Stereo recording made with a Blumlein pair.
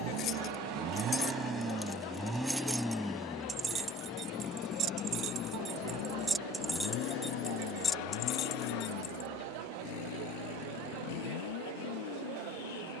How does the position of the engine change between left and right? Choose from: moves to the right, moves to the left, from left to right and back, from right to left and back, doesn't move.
moves to the left.